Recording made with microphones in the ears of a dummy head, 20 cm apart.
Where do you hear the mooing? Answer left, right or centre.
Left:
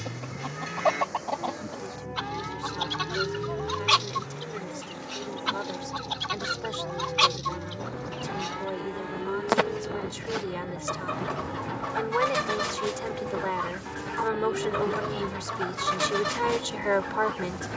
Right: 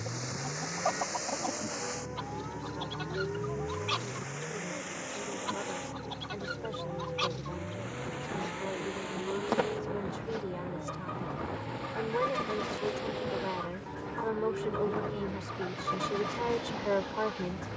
left.